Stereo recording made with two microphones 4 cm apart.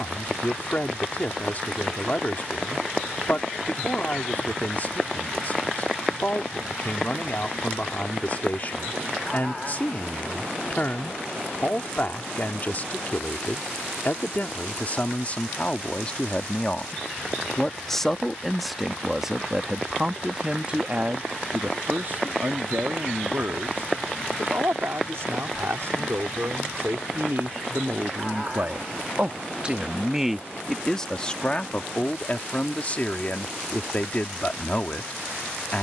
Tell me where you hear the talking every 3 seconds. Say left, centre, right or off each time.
left, left, left, left, left, left, centre, right, right, right, left, left.